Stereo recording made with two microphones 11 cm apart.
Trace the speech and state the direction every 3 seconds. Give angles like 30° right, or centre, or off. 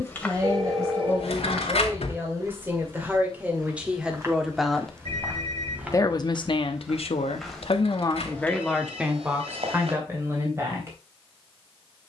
30° right, 10° right, 40° left, 20° right.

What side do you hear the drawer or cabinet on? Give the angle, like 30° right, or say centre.
70° left.